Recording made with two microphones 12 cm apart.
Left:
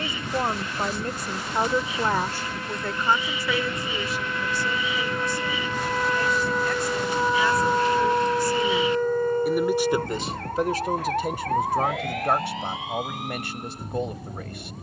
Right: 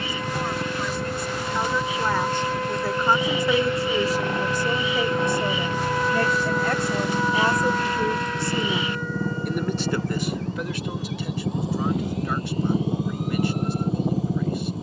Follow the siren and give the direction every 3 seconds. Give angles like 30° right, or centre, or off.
50° right, 30° right, 20° left, 50° left, 70° left.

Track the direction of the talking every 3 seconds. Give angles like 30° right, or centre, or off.
30° left, 40° right, 40° right, 30° left, 60° left.